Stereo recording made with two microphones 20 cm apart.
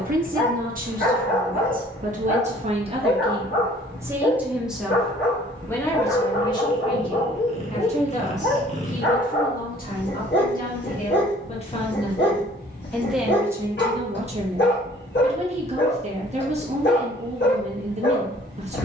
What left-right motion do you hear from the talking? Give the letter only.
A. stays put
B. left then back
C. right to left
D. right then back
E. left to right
B.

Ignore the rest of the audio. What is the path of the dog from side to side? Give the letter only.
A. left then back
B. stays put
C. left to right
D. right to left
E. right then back
B.